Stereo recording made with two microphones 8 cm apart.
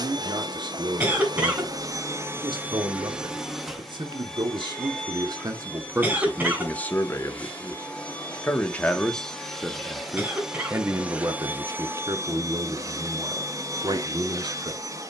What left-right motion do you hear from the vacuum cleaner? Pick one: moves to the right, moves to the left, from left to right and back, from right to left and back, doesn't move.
from right to left and back.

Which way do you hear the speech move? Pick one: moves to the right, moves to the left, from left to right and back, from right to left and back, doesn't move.
from right to left and back.